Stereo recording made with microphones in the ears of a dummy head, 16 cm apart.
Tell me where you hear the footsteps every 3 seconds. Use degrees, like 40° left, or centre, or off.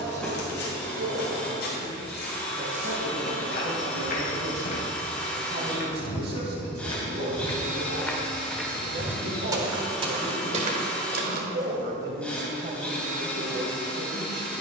60° left, 50° left, 20° left, 30° right, off.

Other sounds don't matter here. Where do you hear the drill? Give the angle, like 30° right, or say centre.
10° left.